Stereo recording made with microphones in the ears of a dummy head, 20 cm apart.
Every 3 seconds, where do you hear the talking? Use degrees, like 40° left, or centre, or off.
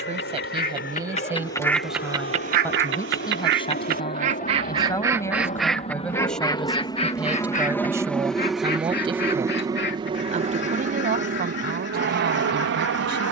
10° right, 20° left, 10° right, 30° right, 50° right.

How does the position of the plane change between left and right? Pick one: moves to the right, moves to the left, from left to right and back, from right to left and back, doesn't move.
moves to the right.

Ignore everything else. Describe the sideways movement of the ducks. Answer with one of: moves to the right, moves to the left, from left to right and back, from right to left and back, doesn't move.
from left to right and back.